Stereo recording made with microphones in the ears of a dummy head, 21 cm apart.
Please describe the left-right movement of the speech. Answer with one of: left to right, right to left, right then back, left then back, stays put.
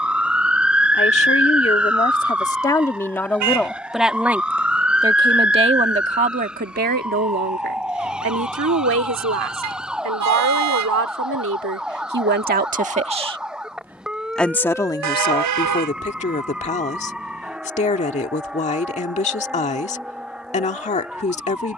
right then back.